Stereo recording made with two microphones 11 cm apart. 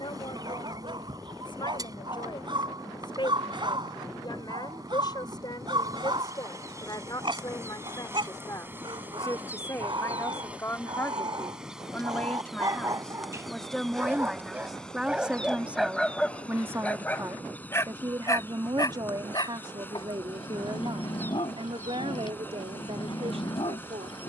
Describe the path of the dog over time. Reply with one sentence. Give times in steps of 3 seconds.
In this clip you hear the dog on the right from 0 s, in the centre from 15 s and on the left from 18 s.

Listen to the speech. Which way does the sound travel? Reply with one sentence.
In this clip you hear the speech travel towards the right.